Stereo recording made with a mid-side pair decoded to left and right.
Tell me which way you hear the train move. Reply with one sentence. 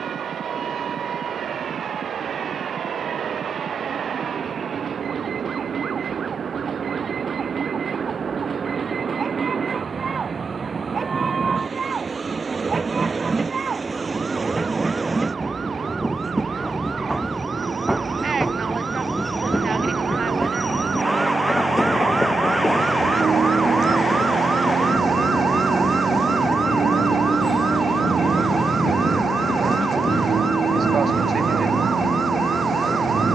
In this clip you hear the train move to the left.